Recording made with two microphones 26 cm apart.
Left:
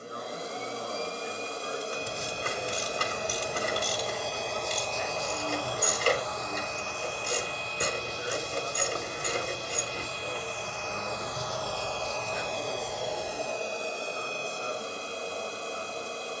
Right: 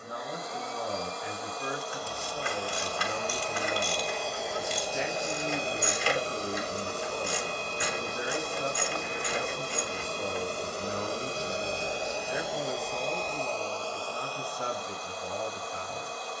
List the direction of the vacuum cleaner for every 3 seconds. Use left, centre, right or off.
left, centre, right, right, centre, left.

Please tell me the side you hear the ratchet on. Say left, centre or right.
left.